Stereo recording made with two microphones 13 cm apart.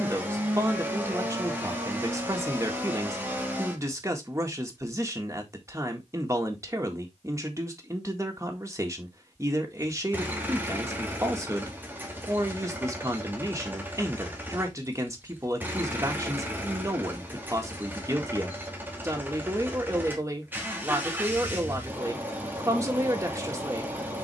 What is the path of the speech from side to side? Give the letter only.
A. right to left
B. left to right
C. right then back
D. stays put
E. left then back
D.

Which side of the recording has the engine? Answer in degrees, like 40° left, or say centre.
20° right.